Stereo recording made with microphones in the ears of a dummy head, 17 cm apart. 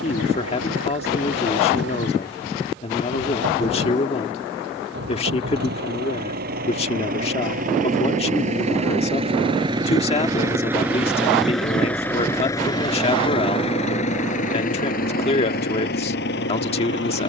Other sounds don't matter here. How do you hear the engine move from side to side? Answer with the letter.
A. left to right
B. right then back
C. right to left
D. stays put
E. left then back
C.